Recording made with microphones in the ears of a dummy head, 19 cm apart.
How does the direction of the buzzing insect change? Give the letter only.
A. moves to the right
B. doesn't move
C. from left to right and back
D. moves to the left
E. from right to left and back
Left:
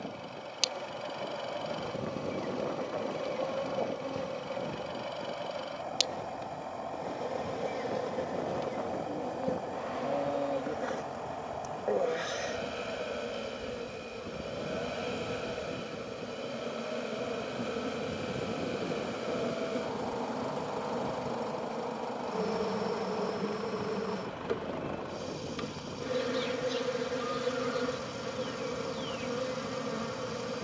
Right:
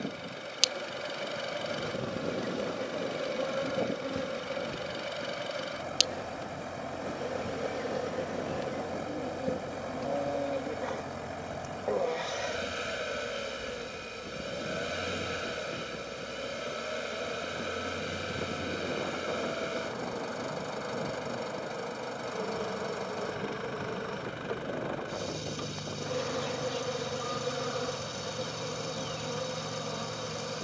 D.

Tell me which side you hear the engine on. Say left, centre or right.
right.